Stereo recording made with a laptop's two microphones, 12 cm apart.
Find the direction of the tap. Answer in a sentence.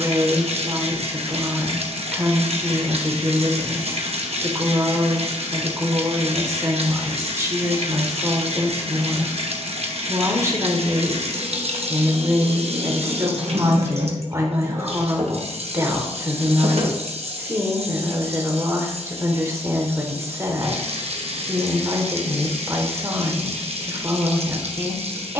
In this clip you hear the tap on the right.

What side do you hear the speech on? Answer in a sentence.
In this clip you hear the speech on the right.